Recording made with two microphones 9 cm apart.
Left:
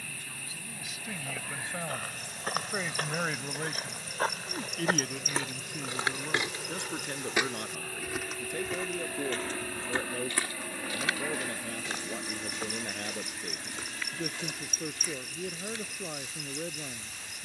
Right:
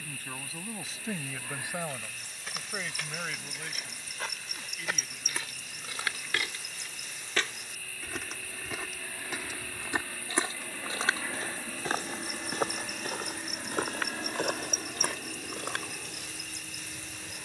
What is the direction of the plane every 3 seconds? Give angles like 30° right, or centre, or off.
70° left, 70° left, 50° left, 20° left, 20° right, 40° right.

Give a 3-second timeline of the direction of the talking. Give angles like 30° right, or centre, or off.
20° right, 50° left, 70° left, 70° left, 70° left, 70° left.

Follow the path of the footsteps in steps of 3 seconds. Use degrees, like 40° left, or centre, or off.
50° left, 40° left, 10° left, 30° right, 50° right, 60° right.